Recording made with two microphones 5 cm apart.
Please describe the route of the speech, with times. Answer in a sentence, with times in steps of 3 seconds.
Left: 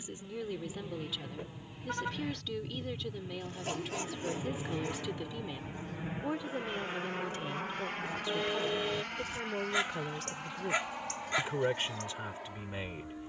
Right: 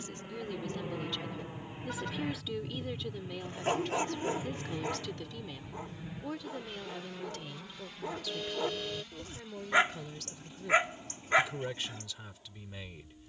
You can hear the speech in the centre from 0 s and on the left from 6 s.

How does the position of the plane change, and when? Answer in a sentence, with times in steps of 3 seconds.
You can hear the plane on the right from 0 s, in the centre from 3 s and on the left from 6 s.